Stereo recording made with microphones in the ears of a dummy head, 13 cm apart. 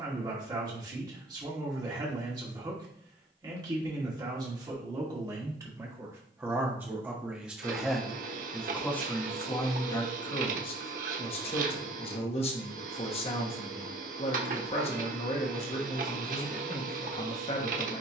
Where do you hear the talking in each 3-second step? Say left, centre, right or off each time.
right, right, centre, left, left, left.